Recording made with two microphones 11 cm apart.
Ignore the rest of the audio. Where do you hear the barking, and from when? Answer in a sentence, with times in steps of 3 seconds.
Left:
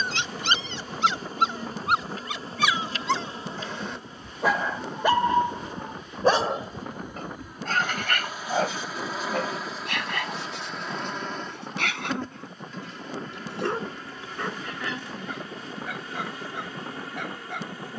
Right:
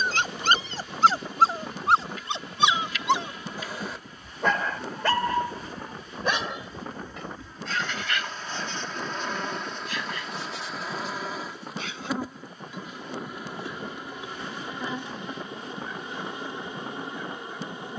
You can hear the barking on the right from 0 s, in the centre from 3 s and on the left from 6 s.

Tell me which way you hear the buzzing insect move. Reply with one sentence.
You can hear the buzzing insect move to the right.